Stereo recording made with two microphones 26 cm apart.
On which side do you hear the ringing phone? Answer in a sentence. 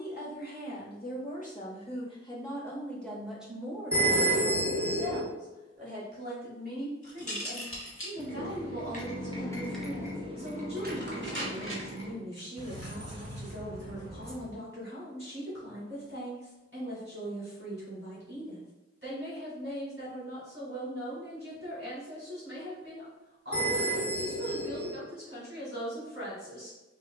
You can hear the ringing phone on the right.